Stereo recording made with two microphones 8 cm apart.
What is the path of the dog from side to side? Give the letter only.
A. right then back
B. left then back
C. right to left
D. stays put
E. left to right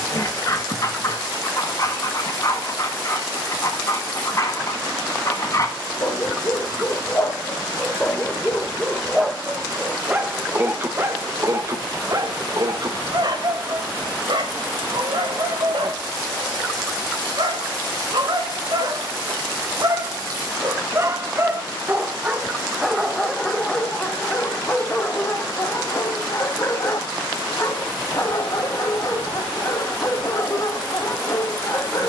A.